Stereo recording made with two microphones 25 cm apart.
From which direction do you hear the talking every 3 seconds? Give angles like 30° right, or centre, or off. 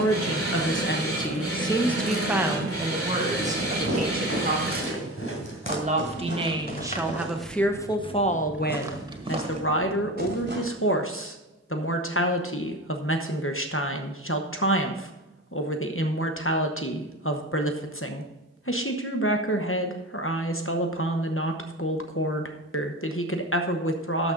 20° left, 30° right, 10° left, 60° left, 60° left, 60° left, 60° left, 60° left.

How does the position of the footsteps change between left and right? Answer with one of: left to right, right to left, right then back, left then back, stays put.
left to right.